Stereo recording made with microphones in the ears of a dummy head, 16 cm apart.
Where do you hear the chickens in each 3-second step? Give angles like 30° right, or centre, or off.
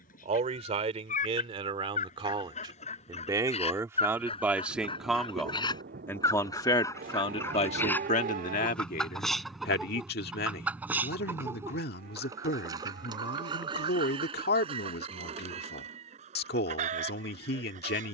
40° left, 30° left, 10° left, 10° right, 30° right, 40° right.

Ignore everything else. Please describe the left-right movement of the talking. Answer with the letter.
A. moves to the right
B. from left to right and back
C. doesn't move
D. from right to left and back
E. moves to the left
E.